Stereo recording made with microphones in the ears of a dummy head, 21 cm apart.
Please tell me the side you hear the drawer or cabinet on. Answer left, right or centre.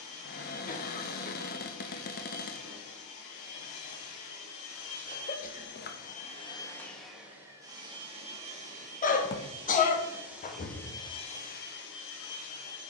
left.